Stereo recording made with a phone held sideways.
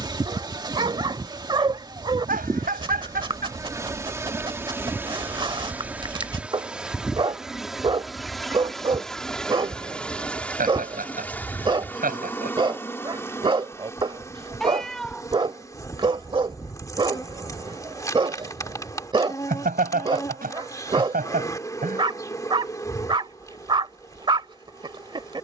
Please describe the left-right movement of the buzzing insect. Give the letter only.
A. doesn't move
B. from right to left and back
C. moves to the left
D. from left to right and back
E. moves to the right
C.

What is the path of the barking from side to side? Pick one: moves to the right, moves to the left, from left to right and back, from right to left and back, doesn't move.
doesn't move.